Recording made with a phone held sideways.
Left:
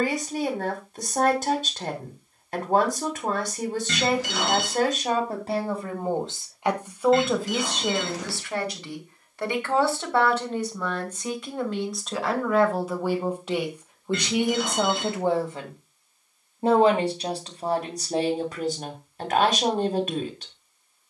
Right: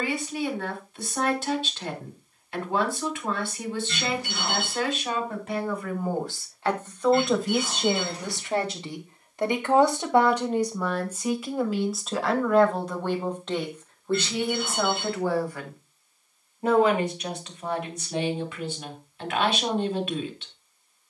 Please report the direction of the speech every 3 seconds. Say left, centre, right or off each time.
left, left, centre, centre, centre, left, left.